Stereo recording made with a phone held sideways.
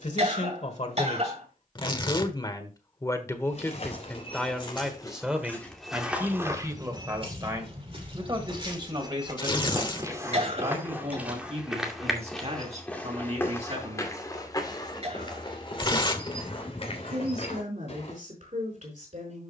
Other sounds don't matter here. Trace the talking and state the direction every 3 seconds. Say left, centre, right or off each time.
left, centre, right, right, right, right, right.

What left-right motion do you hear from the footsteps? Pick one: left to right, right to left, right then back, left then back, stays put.
right then back.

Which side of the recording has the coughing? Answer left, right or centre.
right.